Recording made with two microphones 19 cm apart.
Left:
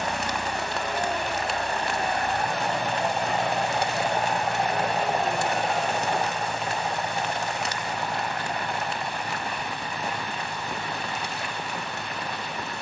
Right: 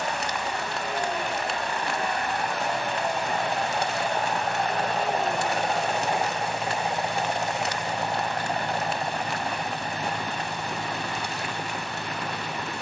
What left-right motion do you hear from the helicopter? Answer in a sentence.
You can hear the helicopter move to the right.